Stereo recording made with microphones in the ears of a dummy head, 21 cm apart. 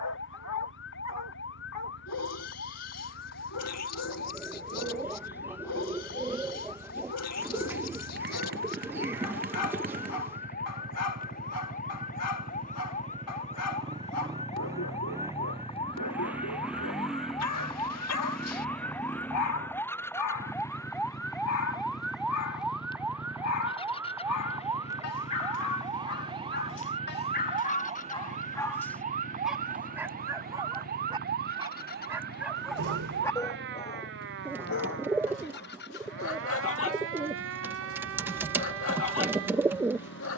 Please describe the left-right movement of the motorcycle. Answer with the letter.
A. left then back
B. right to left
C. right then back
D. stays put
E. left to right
B.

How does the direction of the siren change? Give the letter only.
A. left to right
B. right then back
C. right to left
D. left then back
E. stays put
A.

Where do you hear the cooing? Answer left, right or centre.
centre.